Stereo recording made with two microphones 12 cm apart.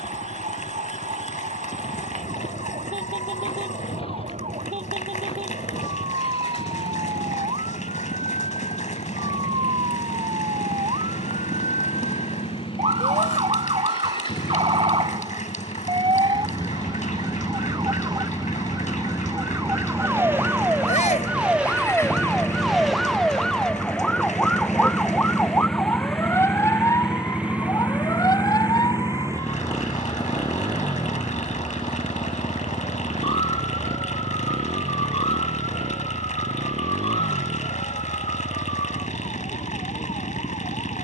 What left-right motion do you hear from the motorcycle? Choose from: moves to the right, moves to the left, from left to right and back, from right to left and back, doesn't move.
moves to the right.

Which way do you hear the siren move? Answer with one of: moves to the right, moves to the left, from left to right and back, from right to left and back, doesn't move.
moves to the left.